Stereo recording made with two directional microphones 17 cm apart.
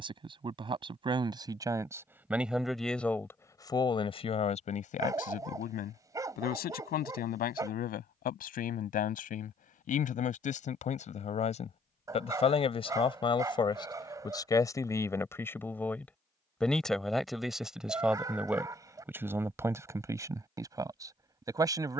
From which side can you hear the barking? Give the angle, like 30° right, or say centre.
20° right.